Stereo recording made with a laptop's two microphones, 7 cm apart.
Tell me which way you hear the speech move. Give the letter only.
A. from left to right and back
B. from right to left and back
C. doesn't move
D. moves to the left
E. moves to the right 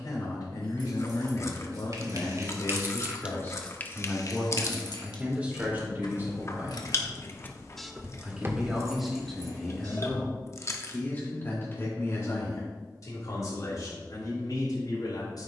A.